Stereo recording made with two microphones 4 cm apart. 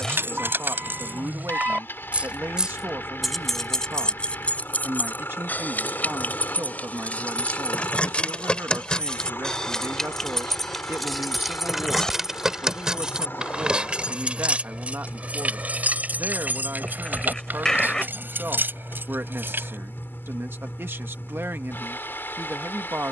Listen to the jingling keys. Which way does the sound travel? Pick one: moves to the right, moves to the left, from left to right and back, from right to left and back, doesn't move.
from right to left and back.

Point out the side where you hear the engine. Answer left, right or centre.
left.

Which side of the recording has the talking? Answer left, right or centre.
right.